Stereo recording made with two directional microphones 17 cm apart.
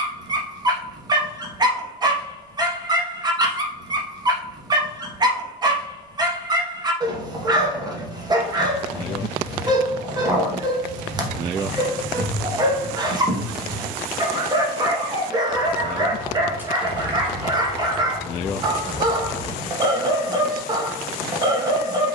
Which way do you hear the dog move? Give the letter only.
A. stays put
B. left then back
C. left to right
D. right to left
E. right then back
A.